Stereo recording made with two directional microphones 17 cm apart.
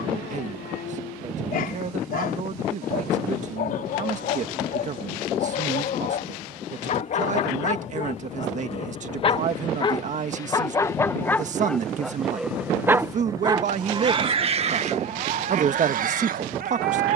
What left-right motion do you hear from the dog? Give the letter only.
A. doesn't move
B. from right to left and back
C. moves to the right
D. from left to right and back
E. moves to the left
C.